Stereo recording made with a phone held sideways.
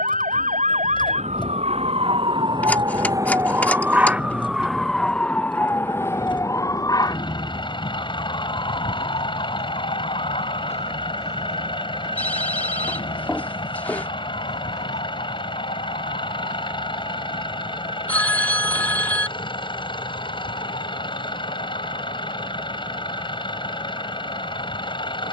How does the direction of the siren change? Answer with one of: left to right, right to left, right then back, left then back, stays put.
right to left.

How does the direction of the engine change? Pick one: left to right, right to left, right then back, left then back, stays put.
stays put.